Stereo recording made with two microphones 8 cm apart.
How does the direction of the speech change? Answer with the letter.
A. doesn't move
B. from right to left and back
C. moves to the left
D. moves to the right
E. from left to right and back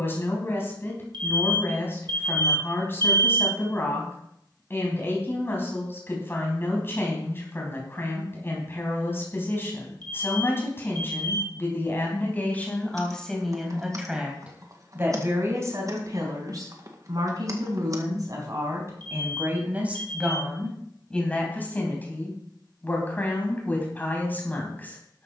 E.